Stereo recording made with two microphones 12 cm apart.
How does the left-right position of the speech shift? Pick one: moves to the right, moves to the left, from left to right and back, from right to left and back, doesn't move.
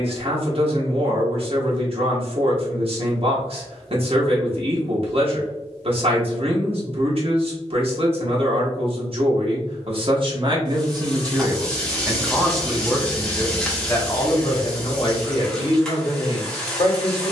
moves to the left.